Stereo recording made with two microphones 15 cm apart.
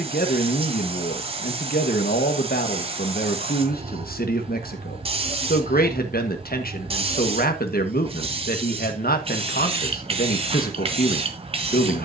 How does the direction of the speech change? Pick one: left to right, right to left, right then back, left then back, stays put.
stays put.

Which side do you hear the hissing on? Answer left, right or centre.
right.